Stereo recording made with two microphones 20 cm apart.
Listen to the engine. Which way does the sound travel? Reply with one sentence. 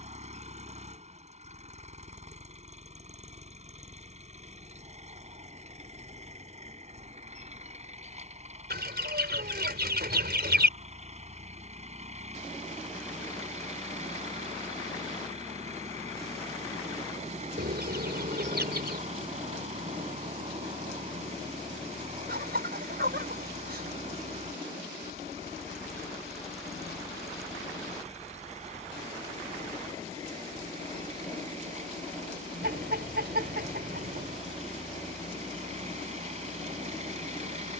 You can hear the engine stay put.